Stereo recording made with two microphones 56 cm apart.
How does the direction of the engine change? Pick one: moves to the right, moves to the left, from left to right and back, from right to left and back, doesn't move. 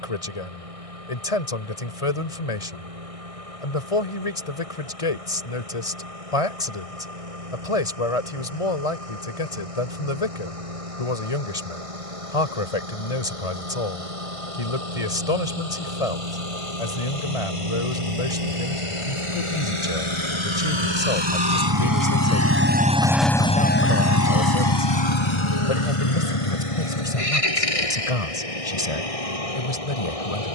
moves to the left.